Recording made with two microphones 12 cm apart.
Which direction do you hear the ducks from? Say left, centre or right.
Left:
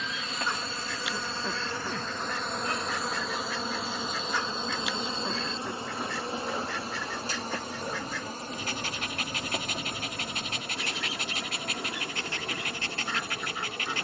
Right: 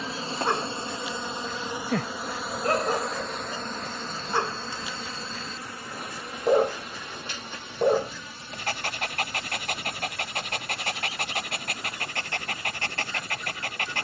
left.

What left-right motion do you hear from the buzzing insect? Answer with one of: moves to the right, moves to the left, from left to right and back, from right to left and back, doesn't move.
moves to the left.